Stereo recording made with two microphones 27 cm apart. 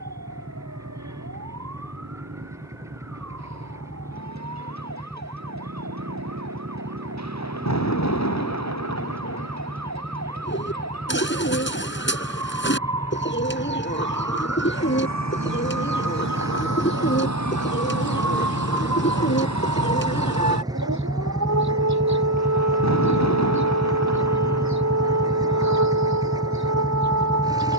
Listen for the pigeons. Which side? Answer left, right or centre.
left.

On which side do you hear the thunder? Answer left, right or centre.
left.